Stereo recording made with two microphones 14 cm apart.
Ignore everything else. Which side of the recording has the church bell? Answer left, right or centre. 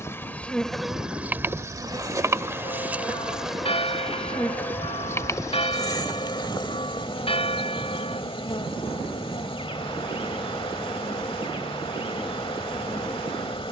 left.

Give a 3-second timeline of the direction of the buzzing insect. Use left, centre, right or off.
centre, centre, left, left, left.